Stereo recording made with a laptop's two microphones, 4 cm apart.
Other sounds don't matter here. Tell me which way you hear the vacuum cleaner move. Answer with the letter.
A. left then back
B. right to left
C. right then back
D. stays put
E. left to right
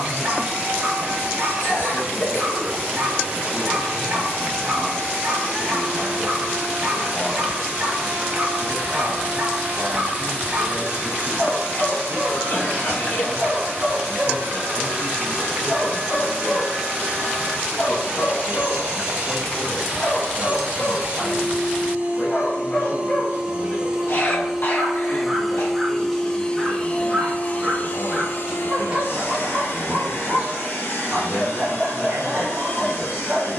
B.